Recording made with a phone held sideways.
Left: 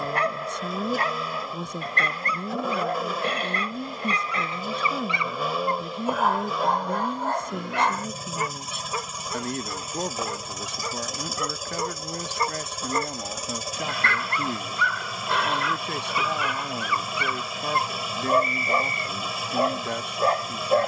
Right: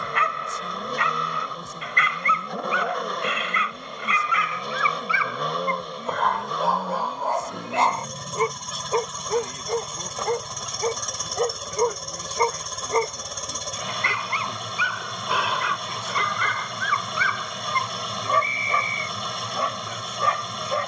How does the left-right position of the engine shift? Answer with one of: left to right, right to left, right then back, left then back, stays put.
stays put.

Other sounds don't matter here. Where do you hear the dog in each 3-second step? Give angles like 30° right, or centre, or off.
40° left, 30° left, 10° right, 40° right, 20° right, 10° left, 30° left.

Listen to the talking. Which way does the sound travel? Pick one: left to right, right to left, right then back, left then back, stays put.
stays put.